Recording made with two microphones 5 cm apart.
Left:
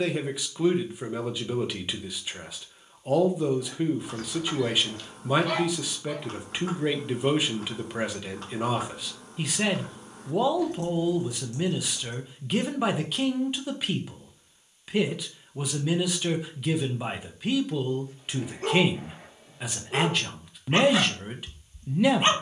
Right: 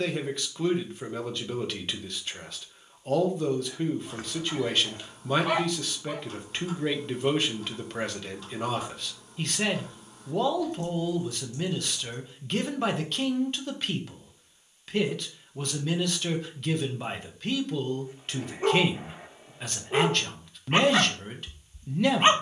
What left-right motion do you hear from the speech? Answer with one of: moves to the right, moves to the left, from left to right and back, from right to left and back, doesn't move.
doesn't move.